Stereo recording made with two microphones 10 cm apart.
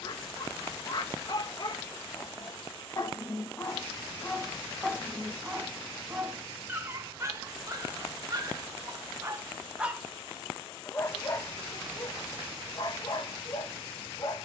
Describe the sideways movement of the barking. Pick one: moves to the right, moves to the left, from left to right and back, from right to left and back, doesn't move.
from left to right and back.